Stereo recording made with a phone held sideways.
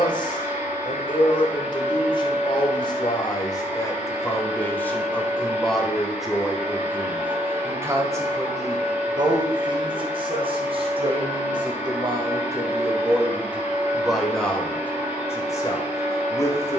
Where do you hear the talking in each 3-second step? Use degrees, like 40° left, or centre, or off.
30° left, 20° left, 10° right, 40° right, 10° right, 20° left.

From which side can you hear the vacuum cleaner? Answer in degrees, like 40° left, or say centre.
20° right.